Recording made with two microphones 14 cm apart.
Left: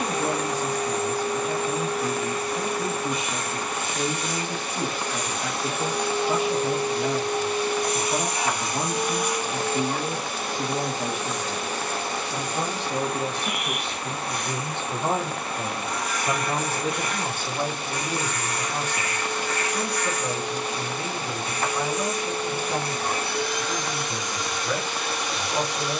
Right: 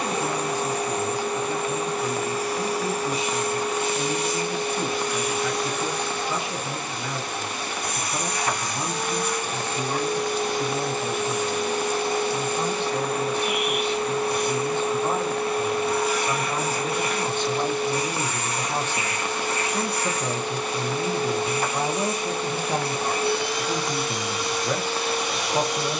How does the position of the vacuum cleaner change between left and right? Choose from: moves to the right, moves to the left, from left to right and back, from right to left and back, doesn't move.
from right to left and back.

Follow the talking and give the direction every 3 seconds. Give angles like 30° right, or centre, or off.
80° left, 80° left, 80° left, 80° left, 70° left, 30° left, 20° right, 30° right, 30° right.